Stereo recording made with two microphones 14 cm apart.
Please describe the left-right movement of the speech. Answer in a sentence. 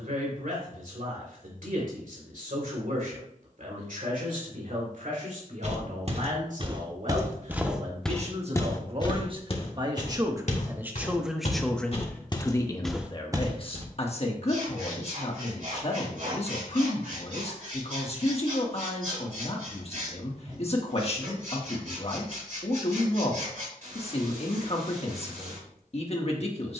You can hear the speech go from the right side to the left.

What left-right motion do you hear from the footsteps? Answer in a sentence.
In this clip you hear the footsteps move from right to left and back again.